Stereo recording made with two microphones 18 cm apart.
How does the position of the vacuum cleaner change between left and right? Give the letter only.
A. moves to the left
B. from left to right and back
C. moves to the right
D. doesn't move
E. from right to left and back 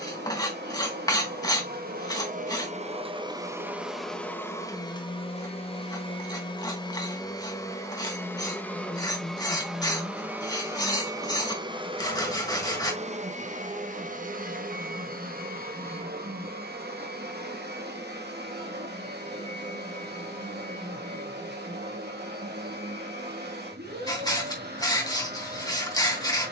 E.